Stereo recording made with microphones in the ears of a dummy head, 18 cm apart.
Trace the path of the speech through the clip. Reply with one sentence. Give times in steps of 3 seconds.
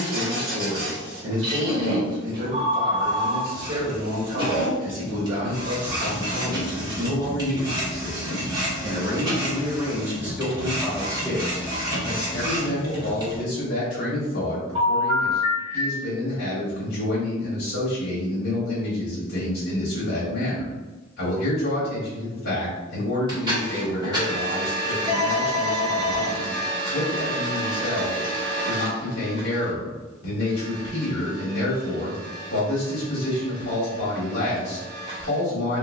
You can hear the speech on the right from 0 s, in the centre from 9 s and on the left from 12 s.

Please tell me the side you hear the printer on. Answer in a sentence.
You can hear the printer on the right.